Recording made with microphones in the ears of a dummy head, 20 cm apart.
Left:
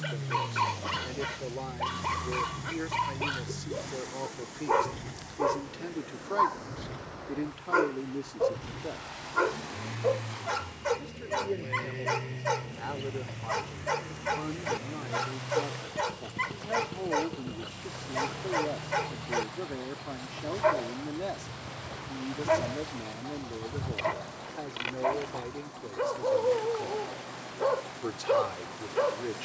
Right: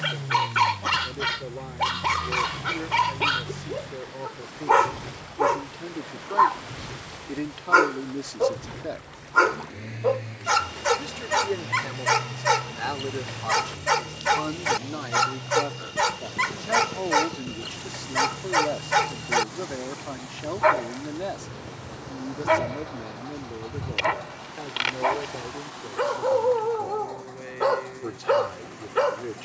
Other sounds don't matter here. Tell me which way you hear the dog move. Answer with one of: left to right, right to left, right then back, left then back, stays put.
stays put.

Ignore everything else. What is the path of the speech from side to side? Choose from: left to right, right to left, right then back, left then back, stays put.
right then back.